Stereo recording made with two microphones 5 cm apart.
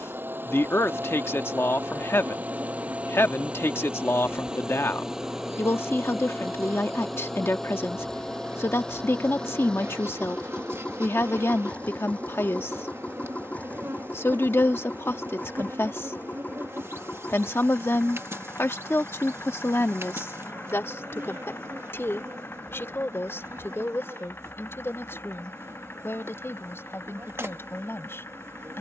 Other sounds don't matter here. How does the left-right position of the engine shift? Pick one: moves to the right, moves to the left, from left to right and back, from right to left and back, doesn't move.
moves to the left.